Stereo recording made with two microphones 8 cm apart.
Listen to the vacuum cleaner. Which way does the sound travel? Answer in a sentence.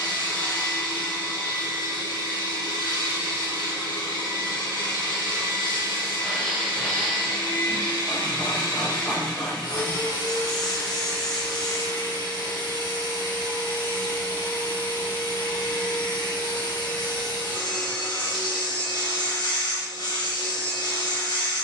In this clip you hear the vacuum cleaner stay in one place.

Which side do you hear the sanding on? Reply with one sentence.
You can hear the sanding in the centre.